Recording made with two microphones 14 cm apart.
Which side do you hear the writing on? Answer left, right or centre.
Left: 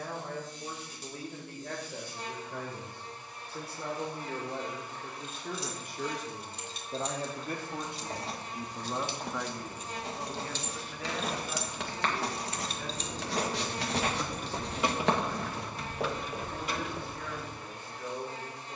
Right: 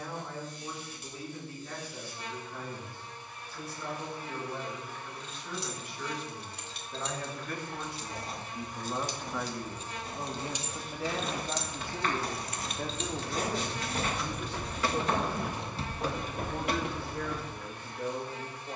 left.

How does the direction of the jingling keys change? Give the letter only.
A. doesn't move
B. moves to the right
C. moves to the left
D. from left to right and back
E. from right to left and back
E.